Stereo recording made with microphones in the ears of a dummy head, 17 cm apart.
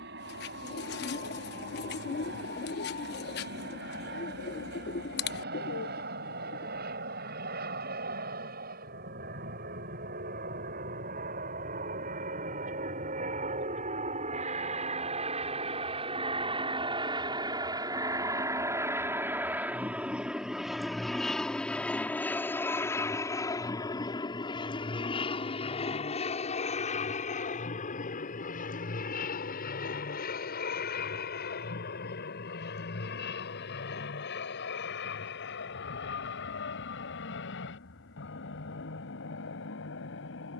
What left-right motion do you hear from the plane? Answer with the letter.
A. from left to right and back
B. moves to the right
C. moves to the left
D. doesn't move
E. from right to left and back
C.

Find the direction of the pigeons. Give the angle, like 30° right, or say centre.
60° left.